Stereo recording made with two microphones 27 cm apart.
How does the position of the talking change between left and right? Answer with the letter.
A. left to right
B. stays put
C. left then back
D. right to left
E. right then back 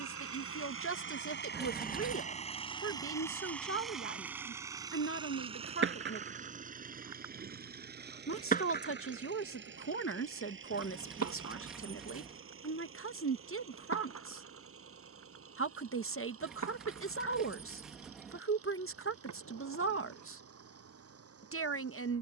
B.